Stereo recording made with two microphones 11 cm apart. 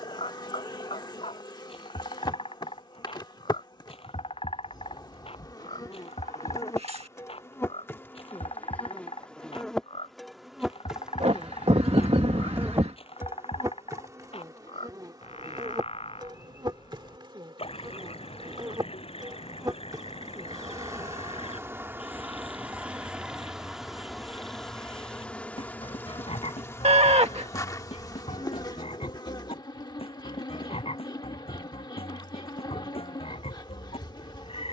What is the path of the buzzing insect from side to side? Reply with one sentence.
You can hear the buzzing insect move from left to right and back again.